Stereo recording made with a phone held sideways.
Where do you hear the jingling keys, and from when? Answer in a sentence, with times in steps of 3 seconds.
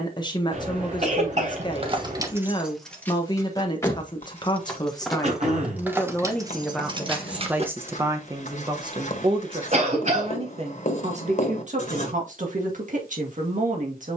You can hear the jingling keys on the right from 0 s, in the centre from 3 s, on the right from 6 s and not at all from 9 s.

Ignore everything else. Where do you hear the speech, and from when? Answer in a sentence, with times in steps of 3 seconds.
You can hear the speech on the left from 0 s, in the centre from 6 s and on the right from 9 s.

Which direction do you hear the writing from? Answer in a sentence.
In this clip you hear the writing on the left.